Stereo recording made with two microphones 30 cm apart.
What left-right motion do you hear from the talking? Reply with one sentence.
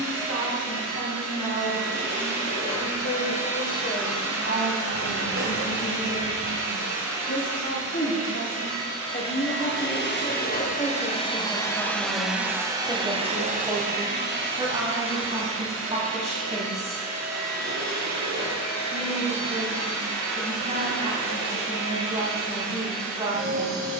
In this clip you hear the talking move from left to right.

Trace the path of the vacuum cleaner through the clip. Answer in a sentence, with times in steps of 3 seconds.
You can hear the vacuum cleaner on the left from 0 s and on the right from 12 s.